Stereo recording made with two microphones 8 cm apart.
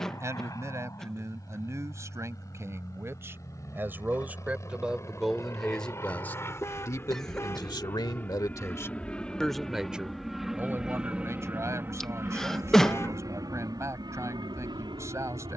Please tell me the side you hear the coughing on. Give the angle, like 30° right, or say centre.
10° left.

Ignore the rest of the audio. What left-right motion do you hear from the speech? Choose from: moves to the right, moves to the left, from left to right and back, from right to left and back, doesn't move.
from right to left and back.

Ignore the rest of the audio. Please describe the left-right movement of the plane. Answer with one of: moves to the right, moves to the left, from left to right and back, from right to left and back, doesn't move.
moves to the right.